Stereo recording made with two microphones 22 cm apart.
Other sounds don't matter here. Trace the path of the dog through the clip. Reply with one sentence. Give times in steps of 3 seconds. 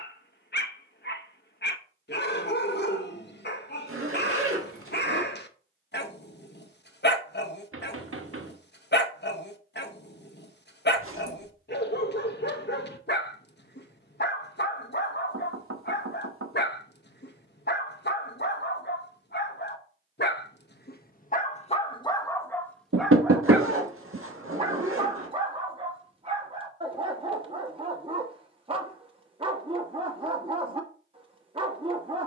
In this clip you hear the dog on the left from 0 s, in the centre from 21 s and on the right from 24 s.